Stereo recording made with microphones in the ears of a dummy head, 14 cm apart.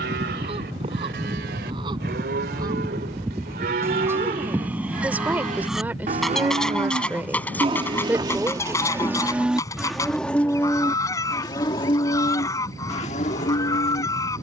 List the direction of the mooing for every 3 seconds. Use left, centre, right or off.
right, right, right, centre, left.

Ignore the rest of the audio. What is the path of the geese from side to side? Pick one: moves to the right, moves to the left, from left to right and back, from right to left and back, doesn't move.
moves to the left.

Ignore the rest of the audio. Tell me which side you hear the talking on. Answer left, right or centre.
centre.